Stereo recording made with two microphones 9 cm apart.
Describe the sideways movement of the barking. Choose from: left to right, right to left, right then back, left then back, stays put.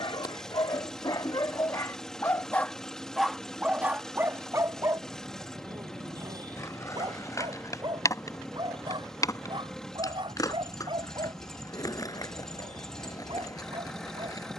left to right.